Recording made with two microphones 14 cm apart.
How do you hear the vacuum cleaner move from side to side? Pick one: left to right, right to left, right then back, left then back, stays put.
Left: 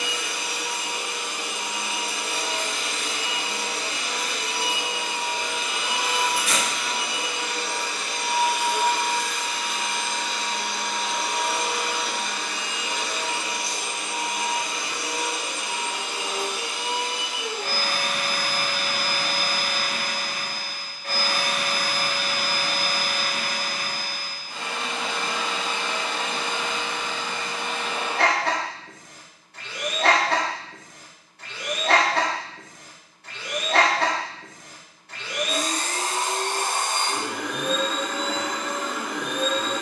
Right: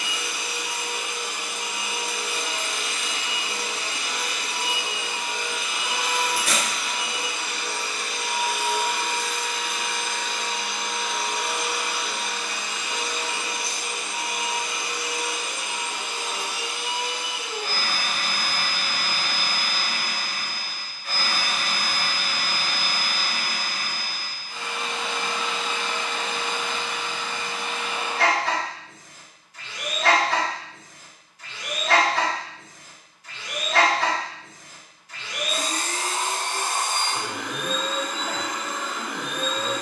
stays put.